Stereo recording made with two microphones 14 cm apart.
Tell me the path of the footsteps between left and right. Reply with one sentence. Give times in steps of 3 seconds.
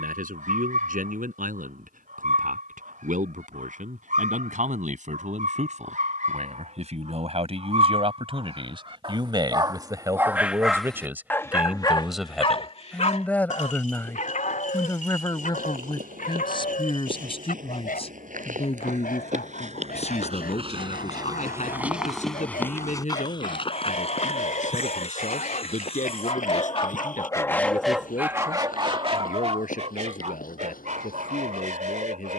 In this clip you hear the footsteps not at all from 0 s, on the right from 15 s, in the centre from 21 s and on the left from 24 s.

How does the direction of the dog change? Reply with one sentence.
You can hear the dog go left and come back.